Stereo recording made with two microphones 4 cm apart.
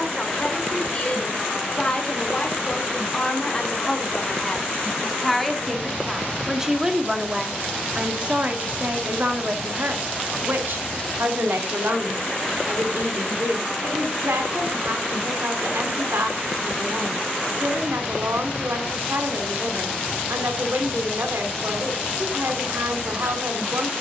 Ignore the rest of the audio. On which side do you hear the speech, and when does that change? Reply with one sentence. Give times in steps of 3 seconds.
You can hear the speech on the left from 0 s, in the centre from 3 s and on the right from 6 s.